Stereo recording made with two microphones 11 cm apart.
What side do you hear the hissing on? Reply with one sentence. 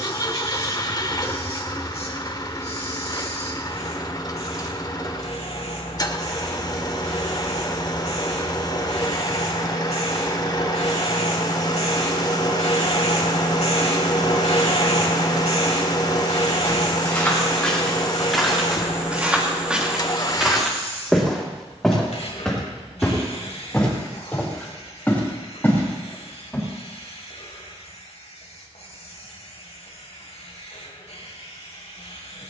You can hear the hissing on the left.